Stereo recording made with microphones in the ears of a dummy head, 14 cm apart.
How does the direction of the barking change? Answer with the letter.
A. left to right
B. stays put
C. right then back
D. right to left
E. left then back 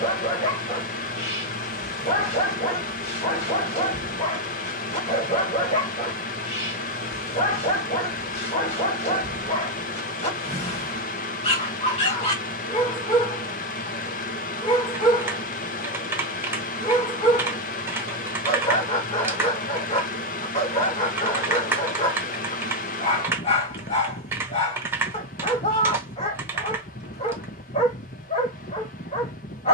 B.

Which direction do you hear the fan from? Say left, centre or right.
left.